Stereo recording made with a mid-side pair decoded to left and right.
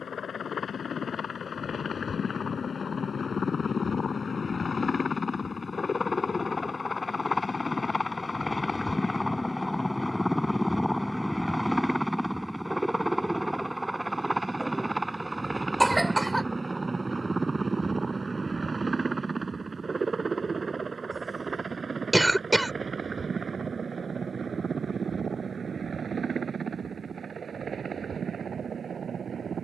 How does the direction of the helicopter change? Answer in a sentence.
You can hear the helicopter move to the right.